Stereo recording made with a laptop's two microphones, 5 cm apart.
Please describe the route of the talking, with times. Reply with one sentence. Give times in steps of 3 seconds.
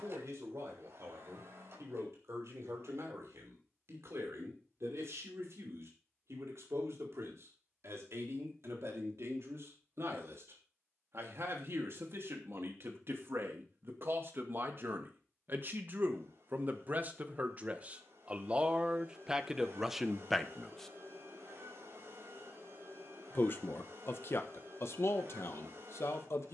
In this clip you hear the talking on the right from 0 s, in the centre from 18 s and on the left from 21 s.